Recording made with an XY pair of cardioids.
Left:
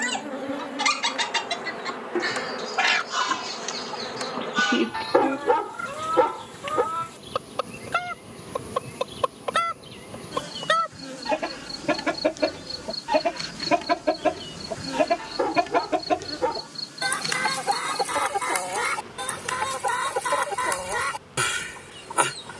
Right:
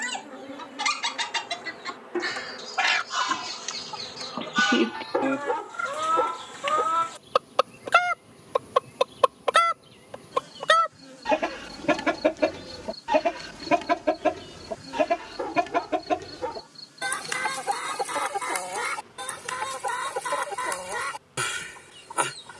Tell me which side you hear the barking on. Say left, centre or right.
left.